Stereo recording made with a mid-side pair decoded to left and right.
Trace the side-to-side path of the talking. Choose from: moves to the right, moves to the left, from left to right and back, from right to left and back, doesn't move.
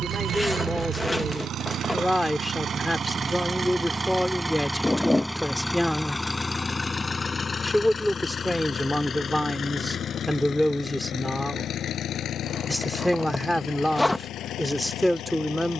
doesn't move.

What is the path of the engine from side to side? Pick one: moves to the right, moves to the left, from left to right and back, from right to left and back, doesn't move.
moves to the left.